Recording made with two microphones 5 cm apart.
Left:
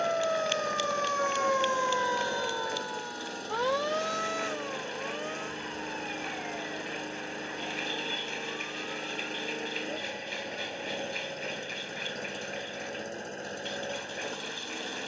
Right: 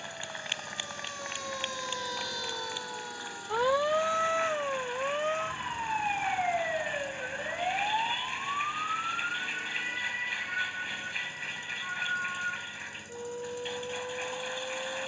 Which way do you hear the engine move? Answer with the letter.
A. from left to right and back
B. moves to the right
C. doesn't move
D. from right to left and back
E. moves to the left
C.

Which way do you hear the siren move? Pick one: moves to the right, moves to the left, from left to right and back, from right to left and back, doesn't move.
moves to the right.